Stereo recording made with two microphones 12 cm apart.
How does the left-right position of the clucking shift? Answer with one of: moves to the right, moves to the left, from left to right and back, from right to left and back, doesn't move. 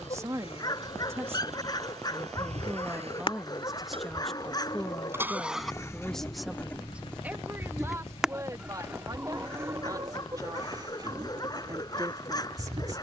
moves to the right.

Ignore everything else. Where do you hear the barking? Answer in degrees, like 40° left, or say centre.
30° left.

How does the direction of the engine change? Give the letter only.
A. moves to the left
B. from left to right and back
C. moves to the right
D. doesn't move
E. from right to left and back
A.